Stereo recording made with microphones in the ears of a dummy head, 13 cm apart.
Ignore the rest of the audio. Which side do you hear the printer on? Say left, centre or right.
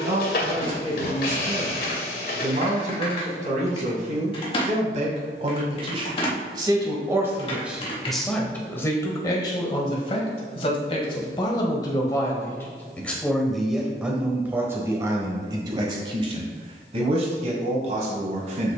left.